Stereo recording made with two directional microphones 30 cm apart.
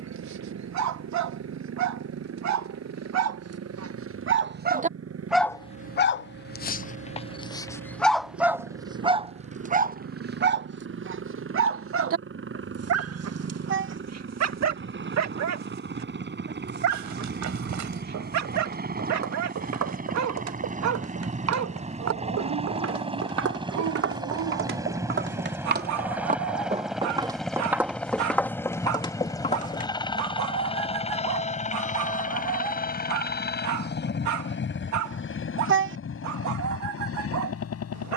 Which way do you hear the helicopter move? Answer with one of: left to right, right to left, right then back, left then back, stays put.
right to left.